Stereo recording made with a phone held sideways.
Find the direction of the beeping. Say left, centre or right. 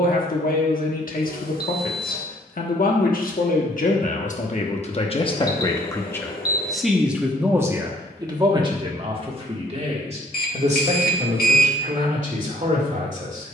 left.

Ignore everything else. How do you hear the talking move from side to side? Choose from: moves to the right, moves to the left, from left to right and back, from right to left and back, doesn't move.
moves to the right.